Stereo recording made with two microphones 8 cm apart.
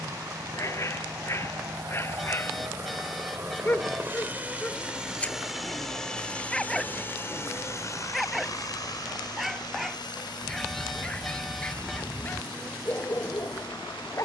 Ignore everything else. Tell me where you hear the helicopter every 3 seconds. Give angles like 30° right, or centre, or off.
50° right, 20° right, 30° left, 60° left, 80° left.